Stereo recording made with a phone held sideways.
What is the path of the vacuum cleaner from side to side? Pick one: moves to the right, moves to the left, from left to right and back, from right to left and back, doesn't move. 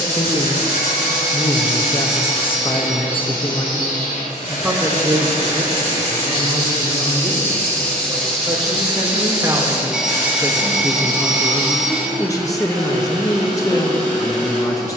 moves to the right.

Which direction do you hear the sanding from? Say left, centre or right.
right.